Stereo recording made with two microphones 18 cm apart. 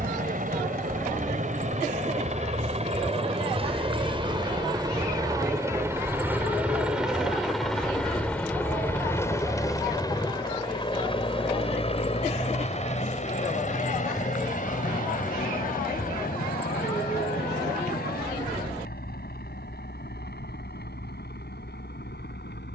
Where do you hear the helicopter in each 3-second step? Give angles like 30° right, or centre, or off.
40° right, 20° right, centre, 20° left, 40° left, 50° left, 60° left, 60° left.